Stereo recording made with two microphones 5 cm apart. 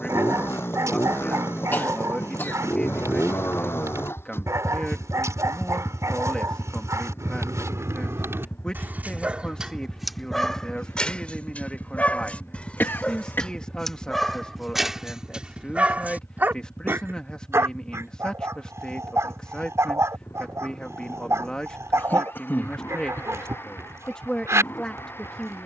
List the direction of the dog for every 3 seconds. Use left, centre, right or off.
right, right, right, centre, centre, right, right, right, right.